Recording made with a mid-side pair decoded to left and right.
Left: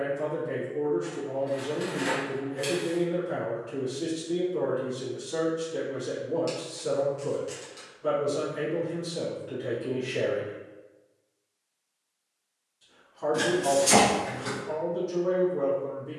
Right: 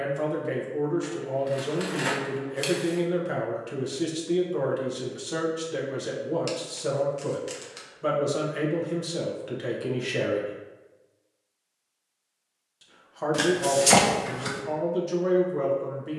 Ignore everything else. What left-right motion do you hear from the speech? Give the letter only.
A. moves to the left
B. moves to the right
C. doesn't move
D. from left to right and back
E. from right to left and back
C.